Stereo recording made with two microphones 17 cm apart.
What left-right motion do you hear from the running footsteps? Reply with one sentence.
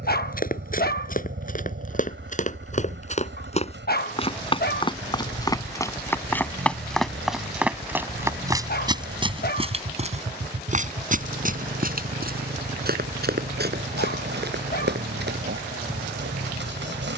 You can hear the running footsteps go from the left side to the right.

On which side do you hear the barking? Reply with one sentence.
You can hear the barking on the left.